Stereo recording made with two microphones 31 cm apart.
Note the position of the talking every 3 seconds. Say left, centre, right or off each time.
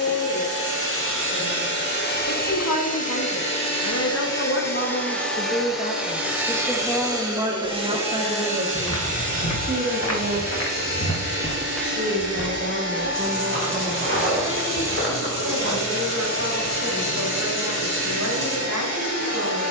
left, left, centre, right, right, right, right.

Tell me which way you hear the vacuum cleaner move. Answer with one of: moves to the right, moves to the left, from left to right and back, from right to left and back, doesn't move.
moves to the right.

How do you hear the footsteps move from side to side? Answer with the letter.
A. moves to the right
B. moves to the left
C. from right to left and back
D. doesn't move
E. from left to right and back
A.